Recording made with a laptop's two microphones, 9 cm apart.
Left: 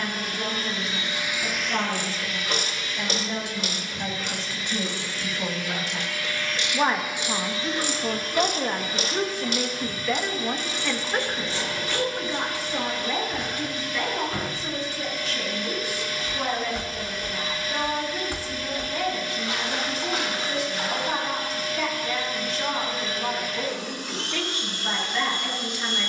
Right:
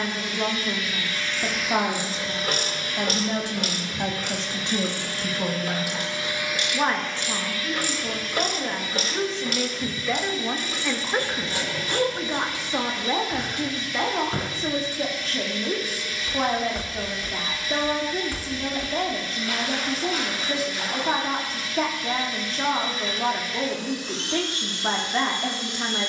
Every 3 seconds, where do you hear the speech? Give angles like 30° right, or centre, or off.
40° right, 20° right, 20° left, centre, 30° right, 40° right, 40° right, 40° right, 40° right.